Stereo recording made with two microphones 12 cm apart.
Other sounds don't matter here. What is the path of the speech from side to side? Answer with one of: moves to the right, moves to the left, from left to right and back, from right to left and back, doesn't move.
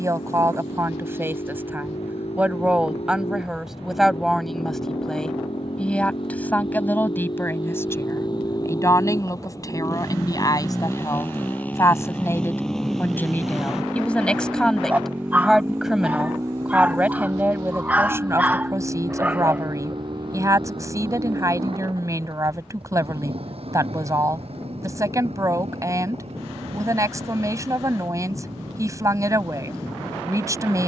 from right to left and back.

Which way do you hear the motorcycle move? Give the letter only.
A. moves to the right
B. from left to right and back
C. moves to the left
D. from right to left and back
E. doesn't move
A.